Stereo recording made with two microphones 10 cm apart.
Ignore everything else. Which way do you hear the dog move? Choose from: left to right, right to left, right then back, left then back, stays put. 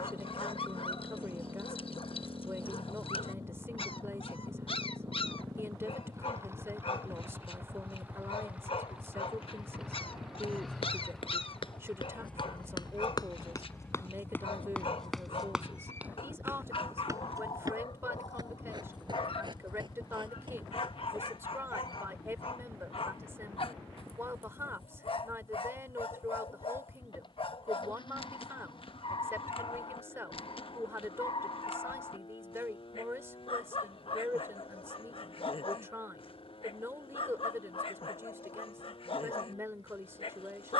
stays put.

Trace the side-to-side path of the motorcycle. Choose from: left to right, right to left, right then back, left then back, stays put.
right to left.